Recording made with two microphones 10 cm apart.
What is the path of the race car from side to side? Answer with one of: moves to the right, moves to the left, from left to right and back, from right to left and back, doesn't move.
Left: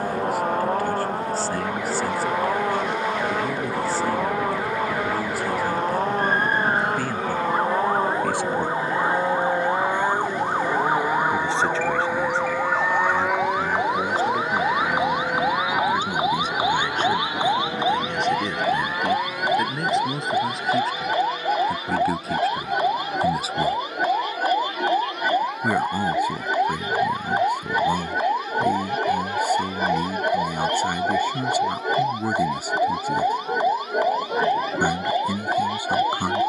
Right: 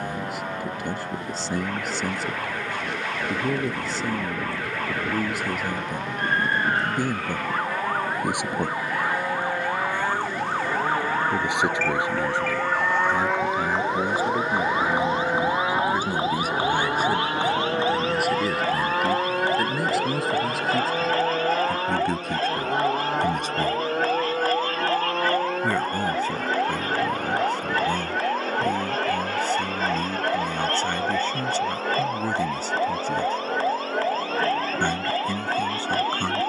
moves to the right.